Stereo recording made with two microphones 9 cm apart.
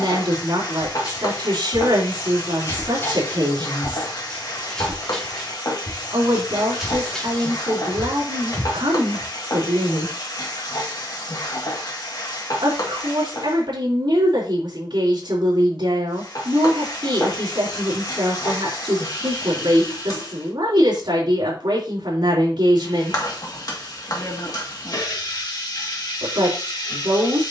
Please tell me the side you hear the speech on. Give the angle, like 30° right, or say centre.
60° right.